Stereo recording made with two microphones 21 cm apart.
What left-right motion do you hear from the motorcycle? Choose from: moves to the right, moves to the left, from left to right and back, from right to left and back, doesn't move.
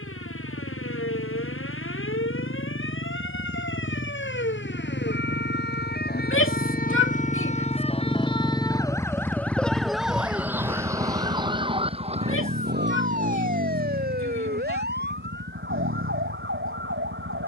moves to the right.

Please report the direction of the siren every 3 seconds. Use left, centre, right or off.
left, left, left, centre, right, right.